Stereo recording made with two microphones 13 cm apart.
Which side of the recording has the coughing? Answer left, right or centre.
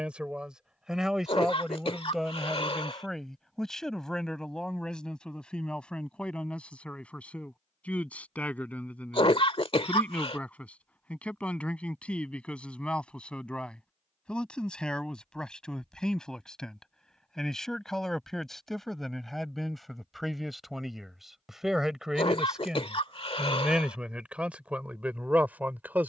left.